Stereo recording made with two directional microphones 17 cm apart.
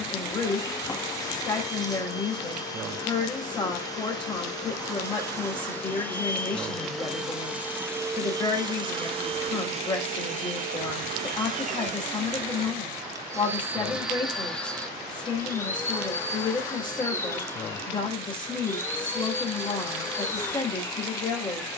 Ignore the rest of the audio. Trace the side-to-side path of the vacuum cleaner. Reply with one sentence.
In this clip you hear the vacuum cleaner go right and come back.